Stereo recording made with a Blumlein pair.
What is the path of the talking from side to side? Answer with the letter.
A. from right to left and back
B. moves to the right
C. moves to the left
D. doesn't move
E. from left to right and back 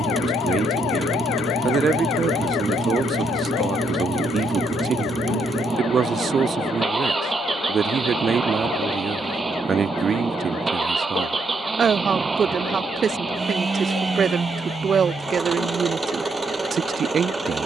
D.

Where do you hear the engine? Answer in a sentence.
You can hear the engine in the centre.